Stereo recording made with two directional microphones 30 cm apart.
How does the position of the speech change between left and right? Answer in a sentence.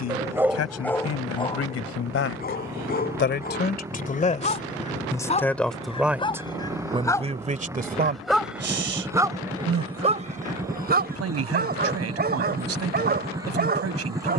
You can hear the speech travel towards the right.